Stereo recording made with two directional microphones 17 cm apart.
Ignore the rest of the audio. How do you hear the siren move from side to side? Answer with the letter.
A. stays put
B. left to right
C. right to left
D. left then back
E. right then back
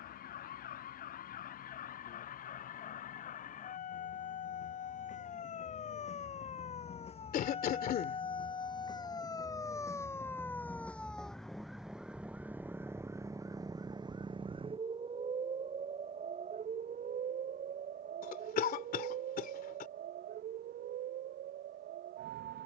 B.